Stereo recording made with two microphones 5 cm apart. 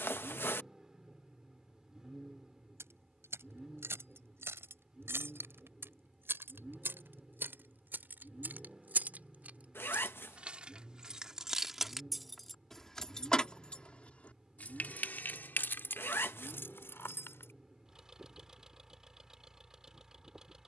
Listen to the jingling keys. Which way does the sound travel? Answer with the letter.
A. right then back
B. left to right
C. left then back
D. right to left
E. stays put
D.